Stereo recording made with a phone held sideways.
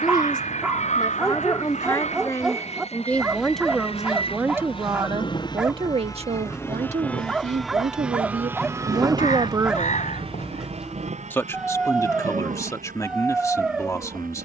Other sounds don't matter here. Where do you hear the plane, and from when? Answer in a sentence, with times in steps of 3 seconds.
In this clip you hear the plane on the left from 0 s, in the centre from 6 s and on the right from 9 s.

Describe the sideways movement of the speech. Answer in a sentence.
In this clip you hear the speech move from left to right and back again.